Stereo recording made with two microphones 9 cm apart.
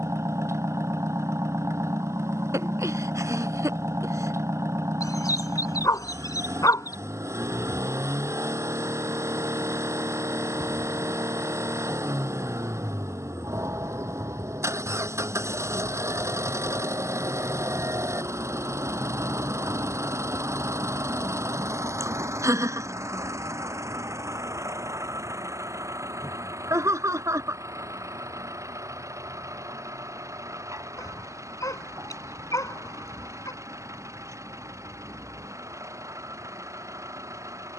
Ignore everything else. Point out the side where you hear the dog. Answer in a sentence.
You can hear the dog on the left.